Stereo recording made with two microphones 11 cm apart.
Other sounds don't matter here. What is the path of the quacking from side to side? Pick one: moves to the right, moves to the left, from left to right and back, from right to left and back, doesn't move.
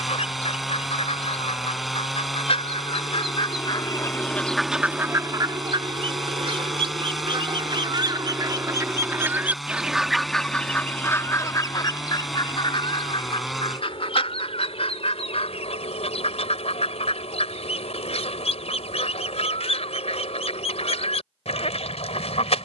from left to right and back.